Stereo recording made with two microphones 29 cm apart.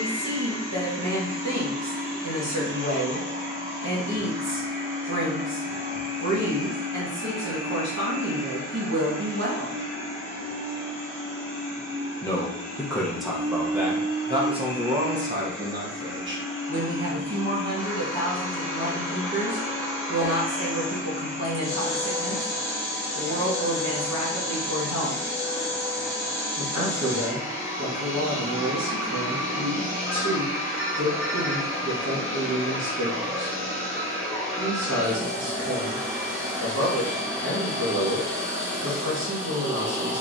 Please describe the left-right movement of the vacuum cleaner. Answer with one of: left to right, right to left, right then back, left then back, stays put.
stays put.